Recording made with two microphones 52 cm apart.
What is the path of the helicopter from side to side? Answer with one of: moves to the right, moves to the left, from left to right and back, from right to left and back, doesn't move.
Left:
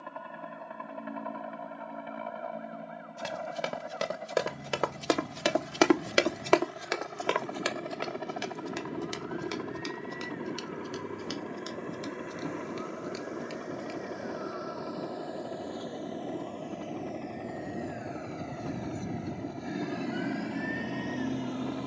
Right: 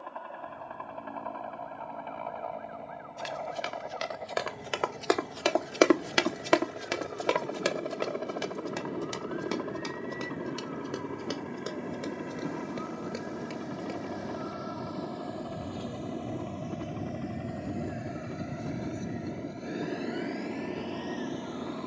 moves to the right.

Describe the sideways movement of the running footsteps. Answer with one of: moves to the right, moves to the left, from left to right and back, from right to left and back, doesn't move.
moves to the right.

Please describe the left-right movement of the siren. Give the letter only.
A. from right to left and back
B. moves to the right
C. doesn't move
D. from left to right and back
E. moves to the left
E.